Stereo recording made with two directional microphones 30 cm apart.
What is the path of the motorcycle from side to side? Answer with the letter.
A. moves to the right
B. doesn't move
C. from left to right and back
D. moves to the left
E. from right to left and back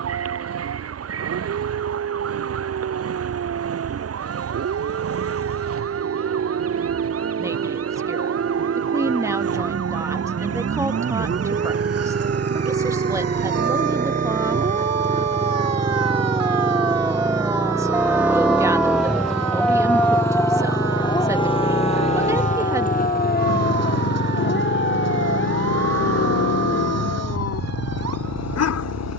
D.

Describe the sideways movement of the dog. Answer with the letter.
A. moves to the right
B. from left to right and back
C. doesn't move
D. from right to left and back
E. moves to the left
E.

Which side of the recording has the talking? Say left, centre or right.
centre.